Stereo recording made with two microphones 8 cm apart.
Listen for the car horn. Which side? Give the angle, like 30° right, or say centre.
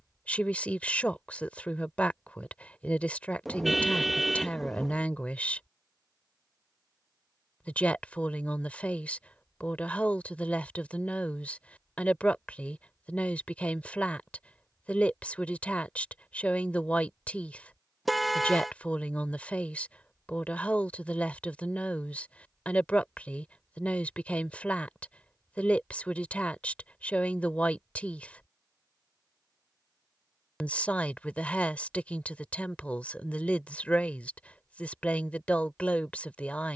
centre.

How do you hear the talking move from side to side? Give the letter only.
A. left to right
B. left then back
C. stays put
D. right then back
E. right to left
C.